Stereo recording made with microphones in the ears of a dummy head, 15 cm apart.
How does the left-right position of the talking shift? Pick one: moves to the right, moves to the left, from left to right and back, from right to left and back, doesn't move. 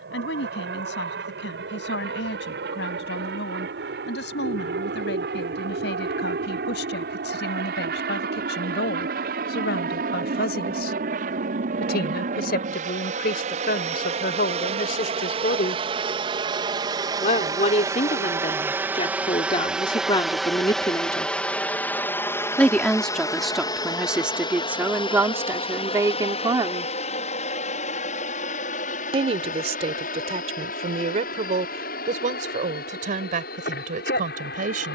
moves to the right.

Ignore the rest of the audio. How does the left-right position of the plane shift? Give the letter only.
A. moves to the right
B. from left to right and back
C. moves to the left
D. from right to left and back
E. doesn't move
C.